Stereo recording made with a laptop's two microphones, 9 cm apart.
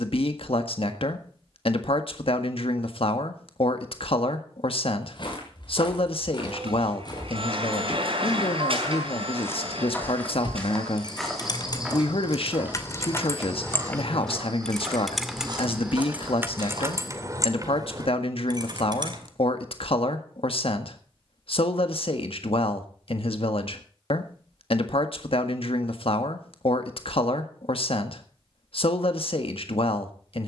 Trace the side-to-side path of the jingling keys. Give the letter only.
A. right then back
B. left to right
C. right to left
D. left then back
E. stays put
B.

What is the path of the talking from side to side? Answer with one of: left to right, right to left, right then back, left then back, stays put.
stays put.